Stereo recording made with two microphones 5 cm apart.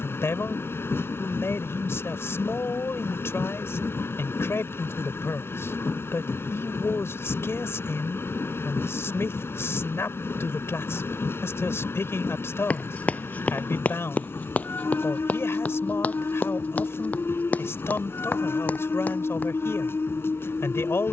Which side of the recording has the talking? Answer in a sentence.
In this clip you hear the talking on the left.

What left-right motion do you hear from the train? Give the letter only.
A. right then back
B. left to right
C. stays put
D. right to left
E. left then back
C.